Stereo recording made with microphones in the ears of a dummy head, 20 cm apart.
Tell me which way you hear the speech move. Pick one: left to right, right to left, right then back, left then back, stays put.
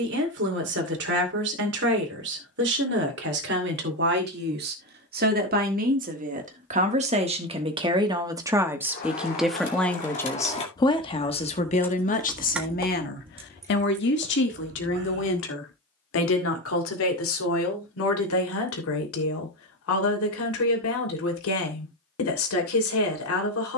right to left.